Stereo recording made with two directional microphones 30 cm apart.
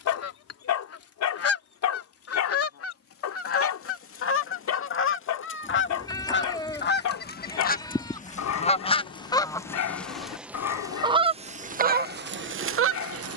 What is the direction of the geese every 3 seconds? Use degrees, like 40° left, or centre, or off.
50° left, 40° left, 30° left, 10° right, 40° right.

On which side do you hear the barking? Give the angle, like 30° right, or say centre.
60° left.